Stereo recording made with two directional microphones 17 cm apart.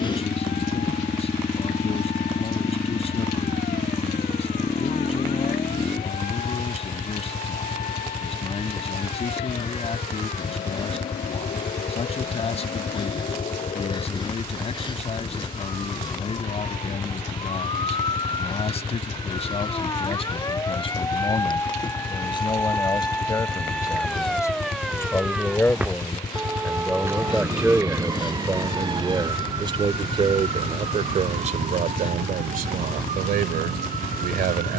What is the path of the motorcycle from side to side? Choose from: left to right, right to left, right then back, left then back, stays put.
stays put.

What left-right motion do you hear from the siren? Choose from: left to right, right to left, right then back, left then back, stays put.
left to right.